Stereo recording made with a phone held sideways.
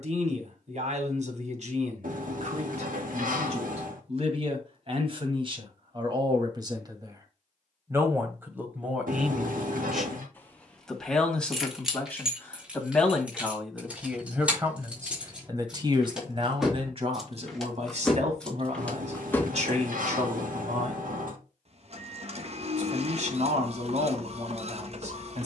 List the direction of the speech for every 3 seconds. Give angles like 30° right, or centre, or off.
60° right, 40° right, 20° right, centre, centre, 40° right, 50° right, 50° right, 50° right.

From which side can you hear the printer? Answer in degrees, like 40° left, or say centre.
50° right.